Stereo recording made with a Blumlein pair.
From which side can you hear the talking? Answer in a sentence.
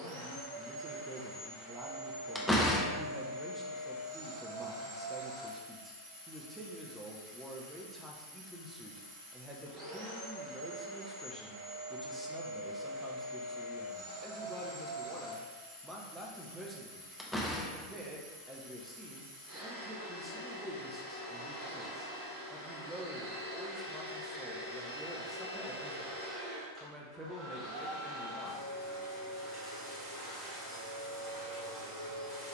You can hear the talking in the centre.